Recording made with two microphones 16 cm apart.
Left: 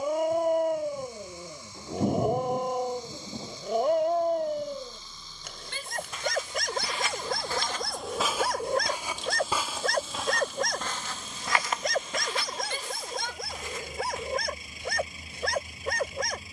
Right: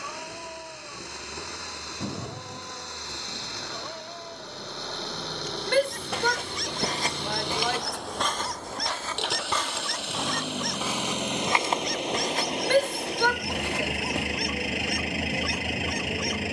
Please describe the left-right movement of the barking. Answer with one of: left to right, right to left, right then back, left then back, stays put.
stays put.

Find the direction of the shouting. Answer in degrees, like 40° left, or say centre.
80° right.